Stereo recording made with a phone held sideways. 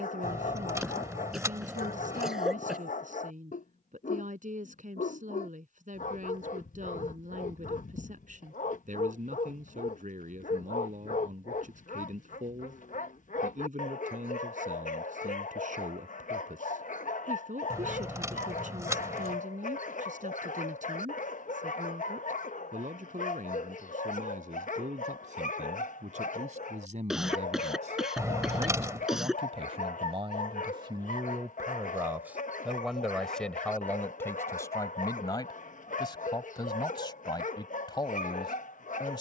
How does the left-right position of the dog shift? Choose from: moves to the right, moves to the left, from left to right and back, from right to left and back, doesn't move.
doesn't move.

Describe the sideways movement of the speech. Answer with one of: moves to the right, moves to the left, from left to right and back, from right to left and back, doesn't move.
moves to the left.